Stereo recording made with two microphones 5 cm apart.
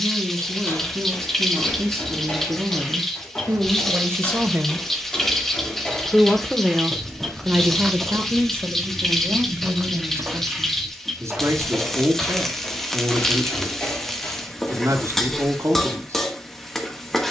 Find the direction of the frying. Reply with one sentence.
In this clip you hear the frying in the centre.